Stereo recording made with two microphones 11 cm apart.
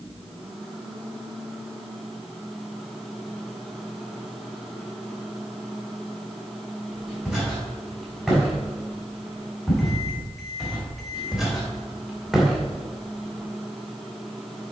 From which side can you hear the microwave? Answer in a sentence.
You can hear the microwave in the centre.